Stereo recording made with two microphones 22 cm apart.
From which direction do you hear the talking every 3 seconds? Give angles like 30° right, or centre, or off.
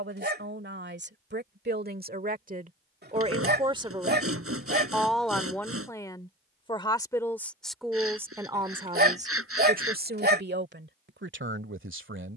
50° right, 10° right, centre, 50° right.